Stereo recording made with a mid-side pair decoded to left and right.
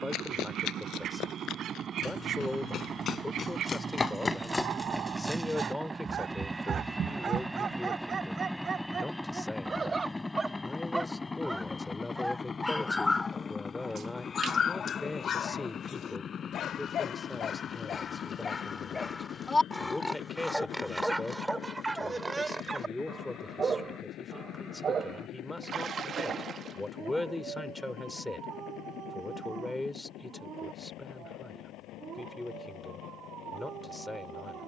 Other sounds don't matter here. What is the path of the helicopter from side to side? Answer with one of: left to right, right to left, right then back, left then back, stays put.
right to left.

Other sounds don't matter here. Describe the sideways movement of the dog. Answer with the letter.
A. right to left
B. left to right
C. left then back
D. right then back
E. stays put
C.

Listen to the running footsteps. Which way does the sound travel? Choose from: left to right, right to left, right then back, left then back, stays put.
left to right.